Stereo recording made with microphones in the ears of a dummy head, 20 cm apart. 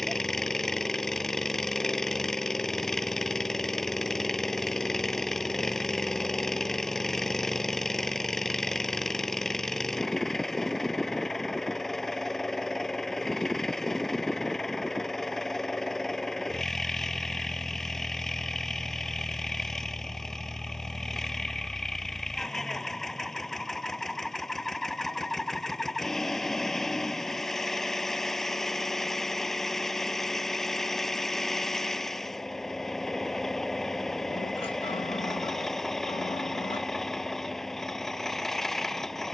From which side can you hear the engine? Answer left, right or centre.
centre.